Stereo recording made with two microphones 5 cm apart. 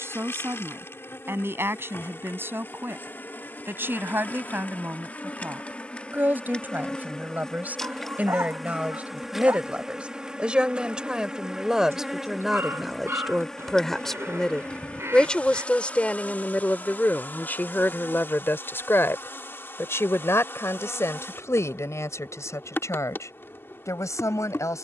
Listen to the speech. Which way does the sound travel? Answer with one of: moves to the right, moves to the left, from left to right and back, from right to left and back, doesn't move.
moves to the left.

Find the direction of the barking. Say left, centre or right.
right.